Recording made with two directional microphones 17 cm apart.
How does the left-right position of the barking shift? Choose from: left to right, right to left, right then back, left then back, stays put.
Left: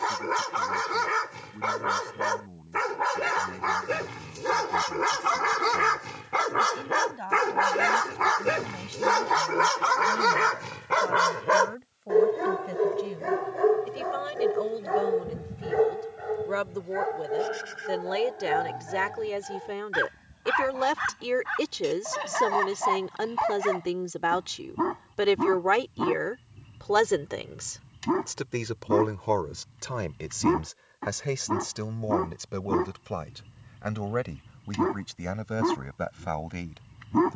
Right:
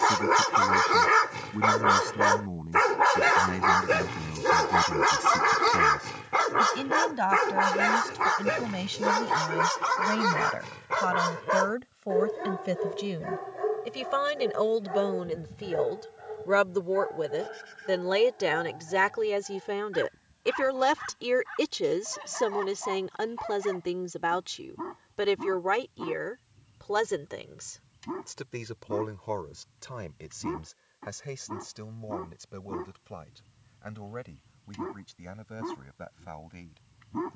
right to left.